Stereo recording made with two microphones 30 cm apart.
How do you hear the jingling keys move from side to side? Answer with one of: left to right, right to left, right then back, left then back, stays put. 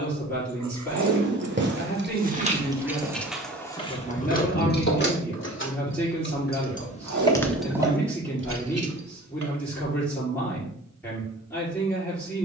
left then back.